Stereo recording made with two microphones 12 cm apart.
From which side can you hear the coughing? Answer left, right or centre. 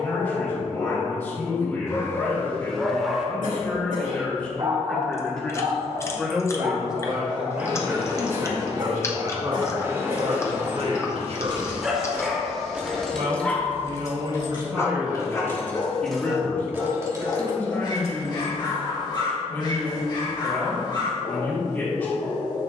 right.